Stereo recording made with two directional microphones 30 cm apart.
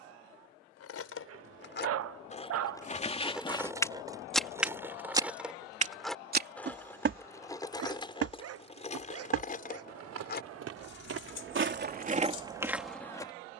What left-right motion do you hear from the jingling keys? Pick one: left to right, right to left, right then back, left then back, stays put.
right then back.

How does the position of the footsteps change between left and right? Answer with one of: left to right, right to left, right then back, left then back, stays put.
right then back.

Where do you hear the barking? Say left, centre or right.
right.